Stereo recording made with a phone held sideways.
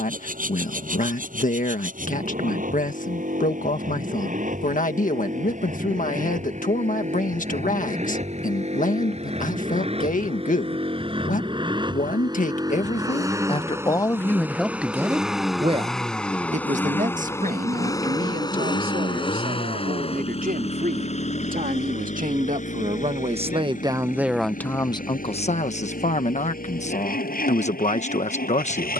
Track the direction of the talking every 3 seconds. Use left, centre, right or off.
left, left, left, left, left, right, right, right, left, left.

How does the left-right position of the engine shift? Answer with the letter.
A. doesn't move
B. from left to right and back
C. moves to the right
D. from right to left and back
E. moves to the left
E.